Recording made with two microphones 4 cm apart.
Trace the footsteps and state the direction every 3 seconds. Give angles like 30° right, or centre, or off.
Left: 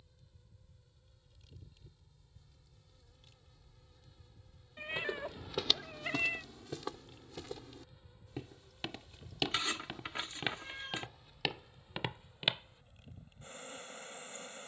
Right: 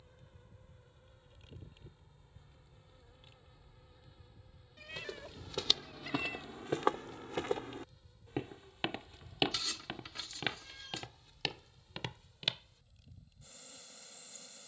off, 10° left, 40° right, centre, 20° left.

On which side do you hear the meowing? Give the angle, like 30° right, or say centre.
40° left.